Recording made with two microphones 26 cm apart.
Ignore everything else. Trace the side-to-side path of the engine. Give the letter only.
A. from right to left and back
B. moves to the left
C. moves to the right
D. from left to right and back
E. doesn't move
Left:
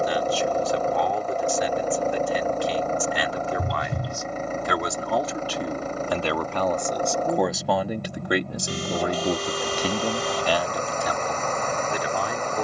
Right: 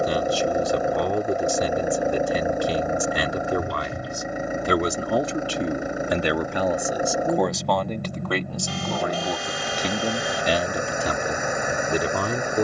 E.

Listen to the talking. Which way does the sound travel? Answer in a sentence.
You can hear the talking move from right to left and back again.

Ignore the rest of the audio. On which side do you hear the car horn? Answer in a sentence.
In this clip you hear the car horn on the left.